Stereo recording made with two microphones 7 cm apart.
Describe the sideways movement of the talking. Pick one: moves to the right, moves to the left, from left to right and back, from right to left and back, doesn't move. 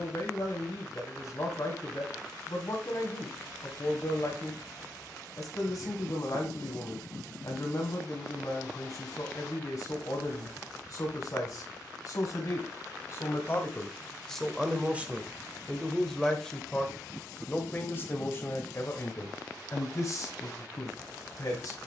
from left to right and back.